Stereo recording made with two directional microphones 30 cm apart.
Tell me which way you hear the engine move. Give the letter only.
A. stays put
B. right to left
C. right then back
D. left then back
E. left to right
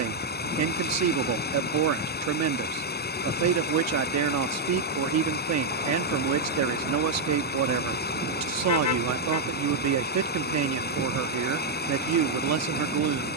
A.